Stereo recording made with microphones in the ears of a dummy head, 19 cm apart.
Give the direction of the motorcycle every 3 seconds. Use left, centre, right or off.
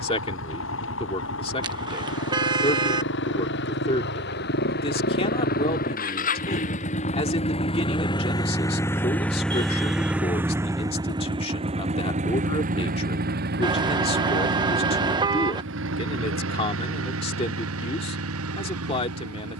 left, left, left, centre, right, right, right.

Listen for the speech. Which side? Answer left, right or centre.
left.